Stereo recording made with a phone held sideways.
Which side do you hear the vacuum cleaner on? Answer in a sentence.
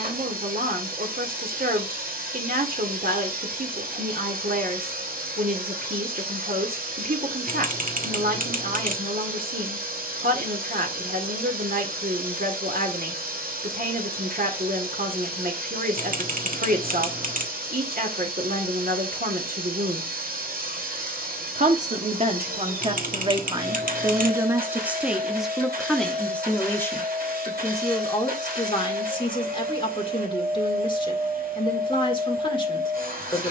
You can hear the vacuum cleaner on the right.